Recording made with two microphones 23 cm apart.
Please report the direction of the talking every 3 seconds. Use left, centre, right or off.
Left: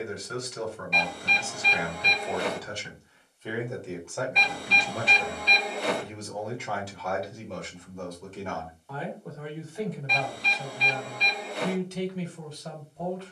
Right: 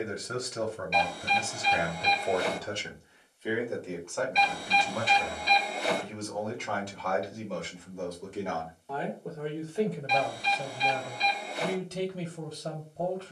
right, centre, centre, right, right.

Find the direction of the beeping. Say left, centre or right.
left.